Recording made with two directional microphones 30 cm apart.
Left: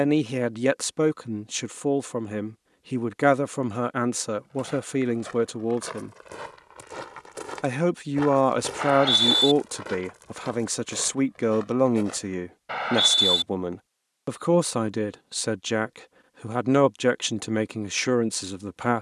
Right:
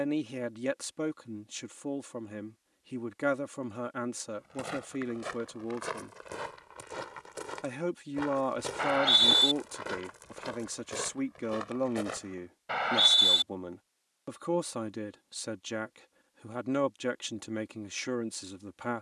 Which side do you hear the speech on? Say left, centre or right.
left.